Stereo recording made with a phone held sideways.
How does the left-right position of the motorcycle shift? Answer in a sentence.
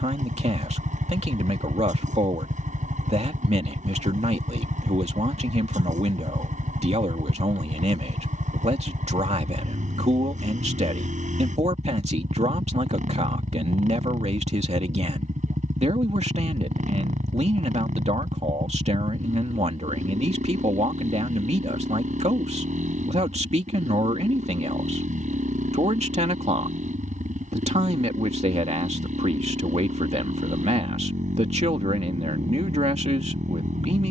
You can hear the motorcycle stay put.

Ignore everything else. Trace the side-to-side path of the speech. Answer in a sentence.
In this clip you hear the speech stay put.